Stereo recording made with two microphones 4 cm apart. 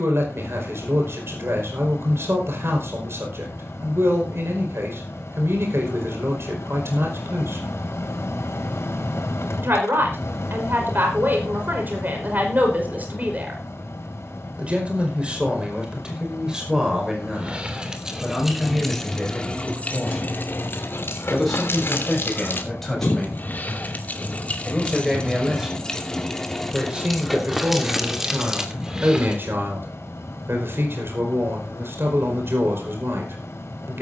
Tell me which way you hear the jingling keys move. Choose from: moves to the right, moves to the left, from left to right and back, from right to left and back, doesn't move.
from right to left and back.